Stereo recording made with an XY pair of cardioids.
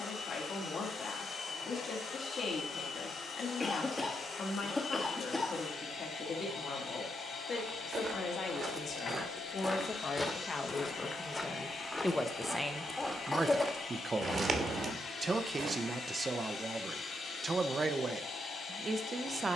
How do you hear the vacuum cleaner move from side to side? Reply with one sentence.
In this clip you hear the vacuum cleaner stay in one place.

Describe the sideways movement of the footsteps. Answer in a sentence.
You can hear the footsteps go left and come back.